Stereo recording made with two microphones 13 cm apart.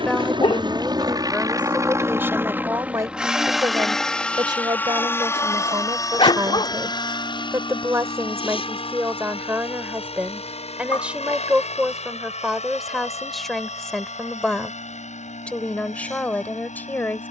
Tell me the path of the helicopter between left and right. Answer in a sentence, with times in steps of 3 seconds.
You can hear the helicopter on the right from 0 s, in the centre from 3 s and on the left from 6 s.